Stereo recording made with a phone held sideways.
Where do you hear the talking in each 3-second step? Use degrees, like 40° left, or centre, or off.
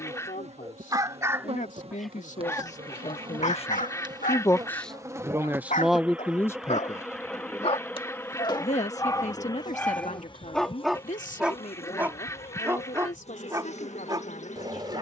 70° left, 20° left, 30° left, 60° left, 70° left.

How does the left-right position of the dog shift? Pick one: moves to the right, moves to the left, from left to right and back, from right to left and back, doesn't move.
from right to left and back.